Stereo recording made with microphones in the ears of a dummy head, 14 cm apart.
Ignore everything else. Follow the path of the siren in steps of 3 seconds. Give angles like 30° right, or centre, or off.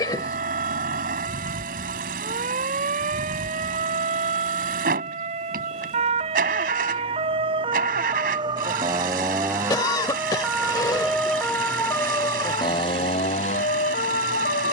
50° right, 50° right, 30° right, 10° right, 40° left.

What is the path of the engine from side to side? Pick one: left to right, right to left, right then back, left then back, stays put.
stays put.